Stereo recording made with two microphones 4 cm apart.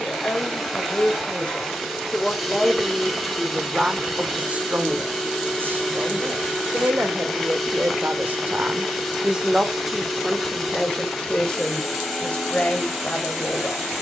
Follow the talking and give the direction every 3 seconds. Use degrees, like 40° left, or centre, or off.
20° left, 30° right, 50° right, centre, 30° left.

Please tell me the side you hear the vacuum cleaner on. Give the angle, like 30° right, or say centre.
centre.